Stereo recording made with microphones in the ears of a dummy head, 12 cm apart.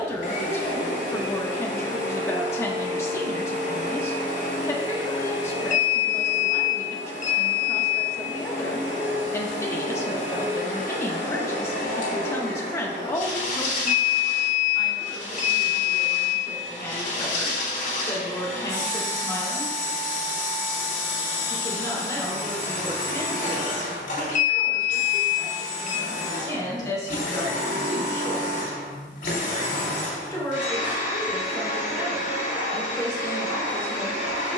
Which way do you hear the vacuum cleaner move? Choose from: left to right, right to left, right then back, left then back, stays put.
stays put.